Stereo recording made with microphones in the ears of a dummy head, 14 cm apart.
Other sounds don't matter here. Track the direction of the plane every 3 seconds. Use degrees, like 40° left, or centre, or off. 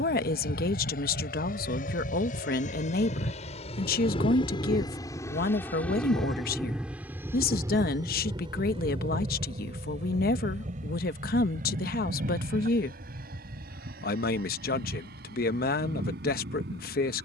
60° left, 30° left, 10° right, 40° right, 60° right, 60° right.